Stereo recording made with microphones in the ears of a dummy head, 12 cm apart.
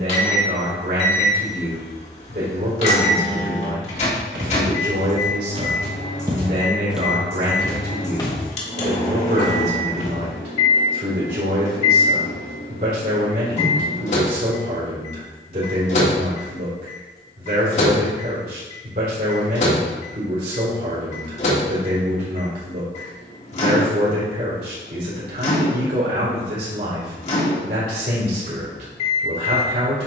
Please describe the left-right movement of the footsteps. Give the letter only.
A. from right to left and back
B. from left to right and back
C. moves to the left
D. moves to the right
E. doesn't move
C.